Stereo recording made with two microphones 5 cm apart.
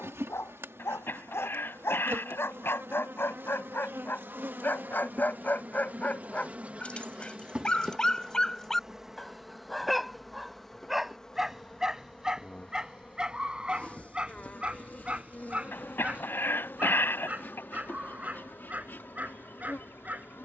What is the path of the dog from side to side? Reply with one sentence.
In this clip you hear the dog go from the left side to the right.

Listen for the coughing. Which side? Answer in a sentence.
In this clip you hear the coughing on the left.